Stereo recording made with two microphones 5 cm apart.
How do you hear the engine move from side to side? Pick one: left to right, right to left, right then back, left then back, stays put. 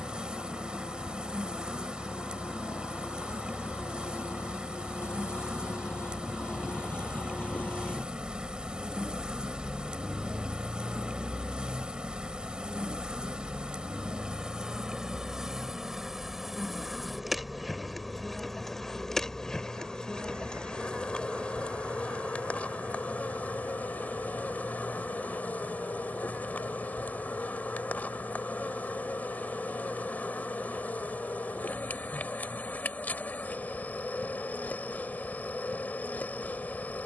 left to right.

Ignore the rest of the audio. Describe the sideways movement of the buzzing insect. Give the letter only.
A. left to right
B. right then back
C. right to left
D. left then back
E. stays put
C.